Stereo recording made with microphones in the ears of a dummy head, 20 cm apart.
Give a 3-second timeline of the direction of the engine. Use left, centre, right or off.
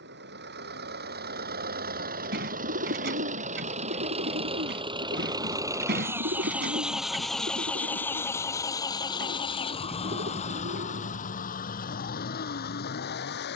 right, right, centre, left, left.